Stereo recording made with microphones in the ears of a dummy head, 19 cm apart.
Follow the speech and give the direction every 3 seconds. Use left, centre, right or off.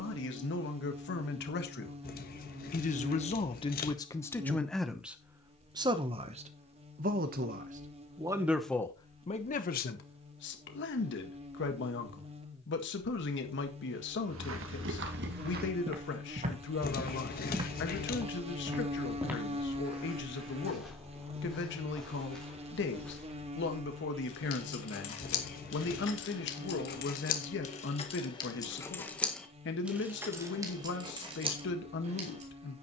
left, centre, right, left, left, left, left, left, left, left, left.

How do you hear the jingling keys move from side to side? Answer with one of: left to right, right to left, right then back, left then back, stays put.
left to right.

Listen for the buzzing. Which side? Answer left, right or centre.
right.